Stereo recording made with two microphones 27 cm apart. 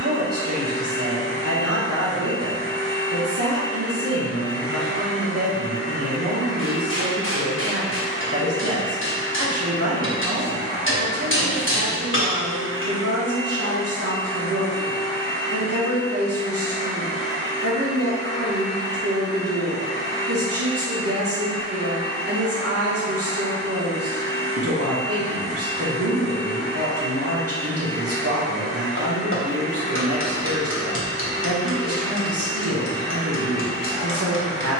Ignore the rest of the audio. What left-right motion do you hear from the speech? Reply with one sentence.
In this clip you hear the speech stay put.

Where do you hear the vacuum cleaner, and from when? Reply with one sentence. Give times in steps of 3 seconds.
You can hear the vacuum cleaner on the right from 0 s, in the centre from 12 s and on the left from 15 s.